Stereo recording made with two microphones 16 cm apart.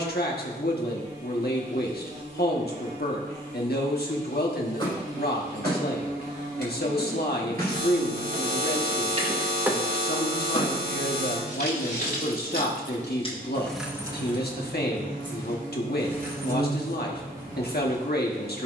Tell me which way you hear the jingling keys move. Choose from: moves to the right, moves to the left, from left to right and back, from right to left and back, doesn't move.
from right to left and back.